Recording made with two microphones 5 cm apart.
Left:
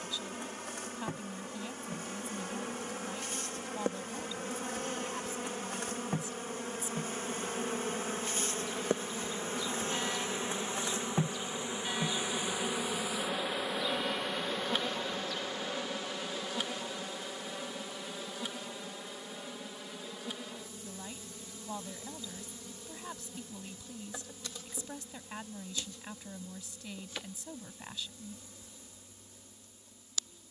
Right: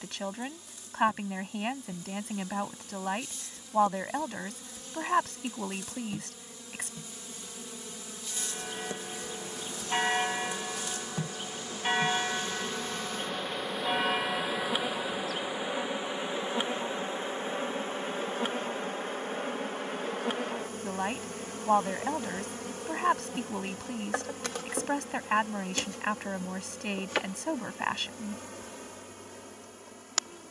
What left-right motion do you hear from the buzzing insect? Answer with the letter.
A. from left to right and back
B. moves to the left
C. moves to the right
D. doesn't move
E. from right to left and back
C.